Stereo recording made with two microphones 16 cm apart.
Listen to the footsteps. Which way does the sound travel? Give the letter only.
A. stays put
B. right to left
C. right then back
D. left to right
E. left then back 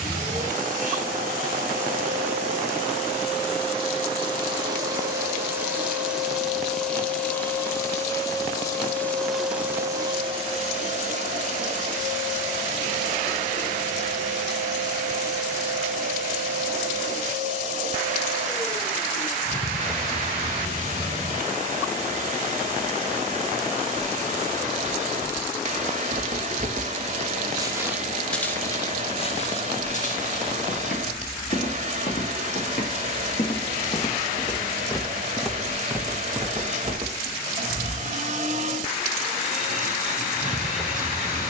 E.